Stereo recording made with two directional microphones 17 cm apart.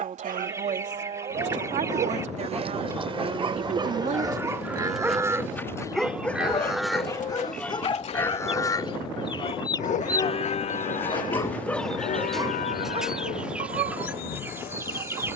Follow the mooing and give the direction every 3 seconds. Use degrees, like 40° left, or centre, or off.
40° right, 20° right, 10° left, 40° left, 60° left.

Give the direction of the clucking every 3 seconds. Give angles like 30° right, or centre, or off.
20° right, centre, 40° left, 20° left, 10° right.